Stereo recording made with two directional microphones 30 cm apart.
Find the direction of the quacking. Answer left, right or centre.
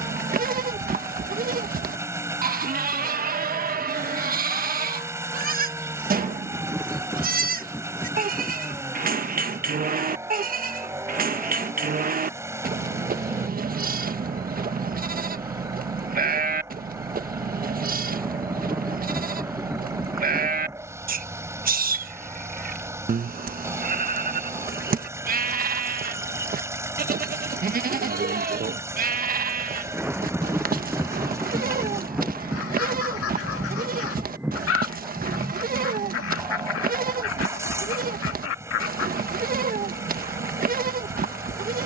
left.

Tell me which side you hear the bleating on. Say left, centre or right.
right.